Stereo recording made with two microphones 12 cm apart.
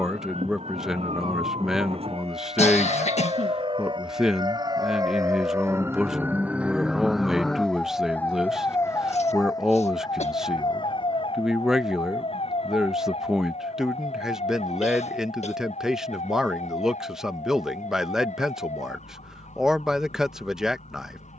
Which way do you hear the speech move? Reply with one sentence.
In this clip you hear the speech stay put.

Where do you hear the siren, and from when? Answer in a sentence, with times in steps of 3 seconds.
You can hear the siren on the right from 0 s, in the centre from 6 s and on the left from 9 s.